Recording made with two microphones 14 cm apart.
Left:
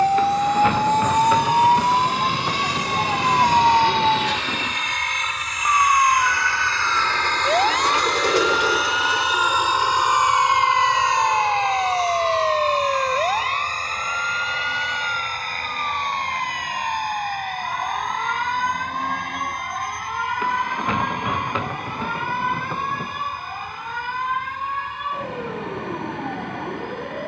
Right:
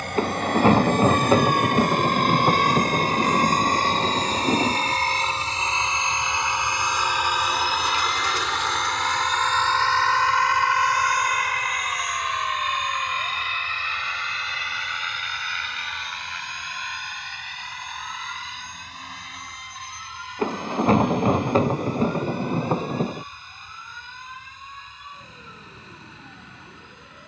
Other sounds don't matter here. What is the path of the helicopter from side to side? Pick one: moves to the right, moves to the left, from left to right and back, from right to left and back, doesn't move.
moves to the left.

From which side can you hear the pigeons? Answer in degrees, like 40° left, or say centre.
80° left.